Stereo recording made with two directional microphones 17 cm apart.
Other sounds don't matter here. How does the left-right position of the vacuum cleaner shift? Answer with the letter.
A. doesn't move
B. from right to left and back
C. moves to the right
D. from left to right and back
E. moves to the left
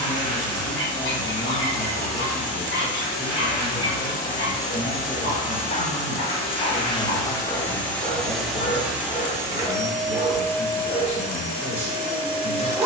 D.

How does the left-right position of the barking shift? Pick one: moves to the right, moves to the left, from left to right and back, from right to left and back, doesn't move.
moves to the right.